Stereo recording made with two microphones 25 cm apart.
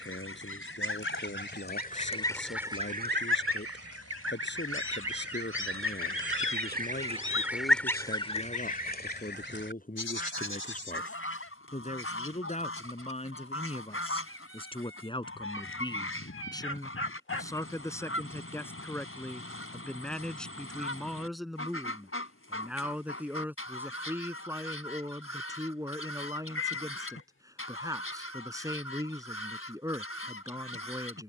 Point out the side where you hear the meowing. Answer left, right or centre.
left.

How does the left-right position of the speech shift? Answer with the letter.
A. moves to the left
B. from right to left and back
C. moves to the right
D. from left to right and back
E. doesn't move
C.